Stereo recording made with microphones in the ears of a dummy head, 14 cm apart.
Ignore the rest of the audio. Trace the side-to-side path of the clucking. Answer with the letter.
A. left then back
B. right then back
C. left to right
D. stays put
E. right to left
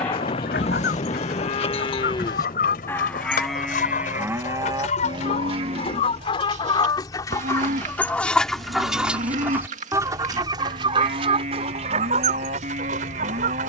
C.